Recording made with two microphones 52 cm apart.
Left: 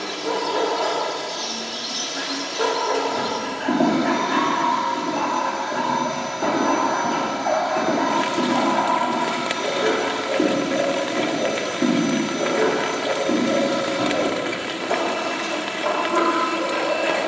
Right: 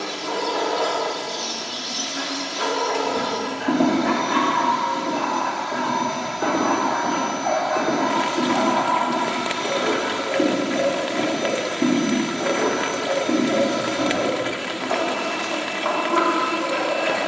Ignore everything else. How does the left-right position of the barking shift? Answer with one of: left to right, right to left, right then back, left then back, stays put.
stays put.